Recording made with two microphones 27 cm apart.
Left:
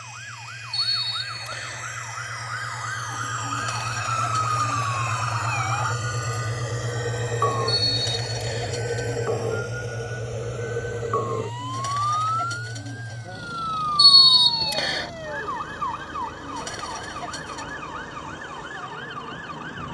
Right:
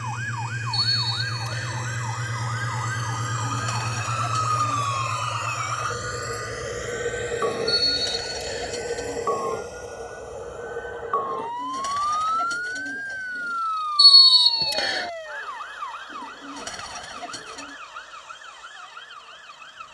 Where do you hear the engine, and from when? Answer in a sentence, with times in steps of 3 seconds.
In this clip you hear the engine on the right from 0 s, in the centre from 3 s and on the left from 6 s.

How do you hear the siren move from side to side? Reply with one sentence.
In this clip you hear the siren move to the left.